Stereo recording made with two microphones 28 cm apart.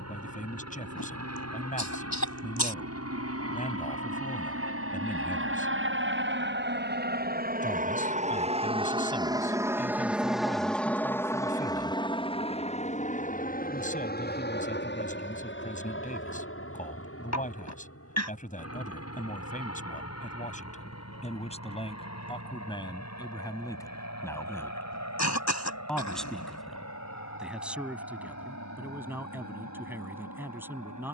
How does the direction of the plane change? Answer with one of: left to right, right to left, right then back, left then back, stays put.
right to left.